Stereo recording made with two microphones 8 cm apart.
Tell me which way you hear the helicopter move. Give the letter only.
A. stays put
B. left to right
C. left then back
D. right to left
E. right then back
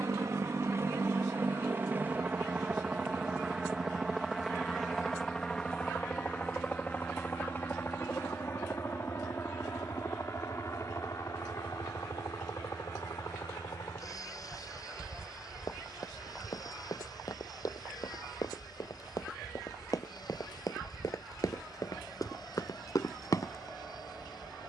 D.